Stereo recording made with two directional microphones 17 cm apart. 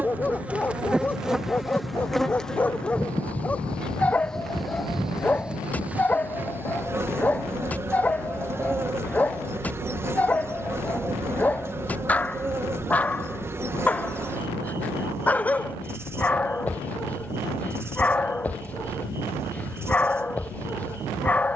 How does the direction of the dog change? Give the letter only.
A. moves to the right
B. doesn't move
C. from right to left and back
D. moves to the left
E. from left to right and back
B.